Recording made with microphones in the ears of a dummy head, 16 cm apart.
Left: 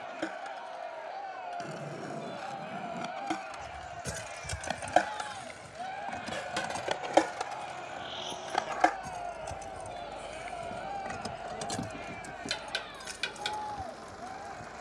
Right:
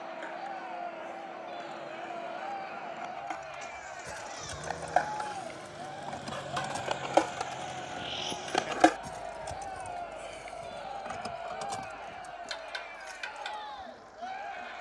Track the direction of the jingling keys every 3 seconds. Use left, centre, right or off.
off, left, centre, centre, left.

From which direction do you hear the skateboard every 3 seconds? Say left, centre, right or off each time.
left, left, centre, off, off.